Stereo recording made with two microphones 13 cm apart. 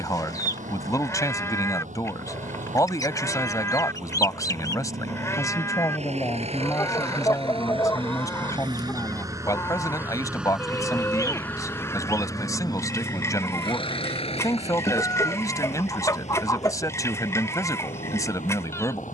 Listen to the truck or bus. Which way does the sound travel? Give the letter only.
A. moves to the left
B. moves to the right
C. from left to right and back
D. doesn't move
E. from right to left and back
A.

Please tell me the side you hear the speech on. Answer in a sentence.
You can hear the speech on the left.